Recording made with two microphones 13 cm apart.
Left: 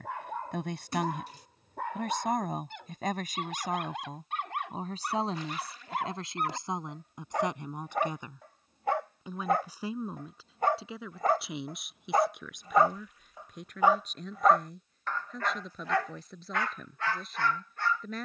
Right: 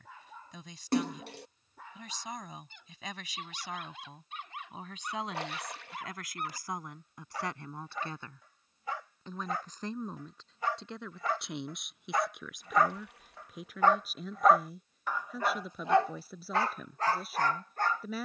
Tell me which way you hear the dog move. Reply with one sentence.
You can hear the dog move to the right.